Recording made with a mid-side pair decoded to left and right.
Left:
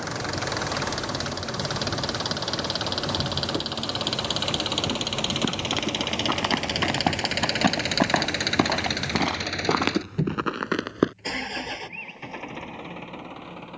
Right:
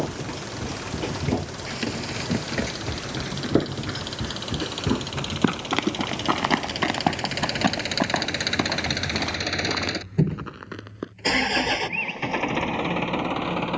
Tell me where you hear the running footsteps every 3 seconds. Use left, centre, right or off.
right, right, centre, left, off.